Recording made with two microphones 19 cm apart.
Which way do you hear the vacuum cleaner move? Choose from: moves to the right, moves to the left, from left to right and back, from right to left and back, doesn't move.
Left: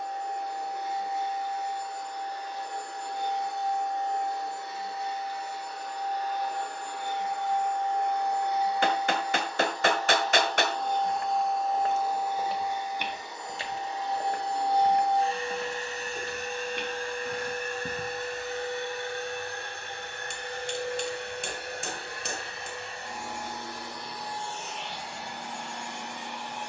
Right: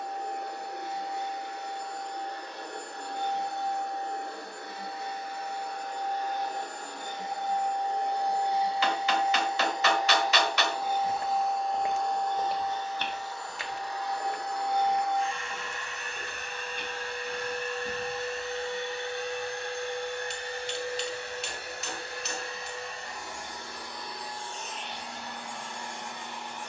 moves to the left.